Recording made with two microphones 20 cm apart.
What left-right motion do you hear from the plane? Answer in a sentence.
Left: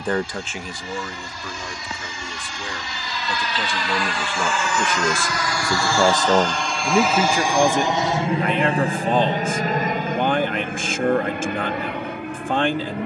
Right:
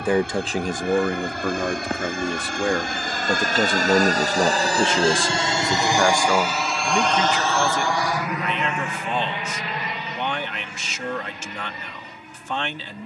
You can hear the plane travel towards the left.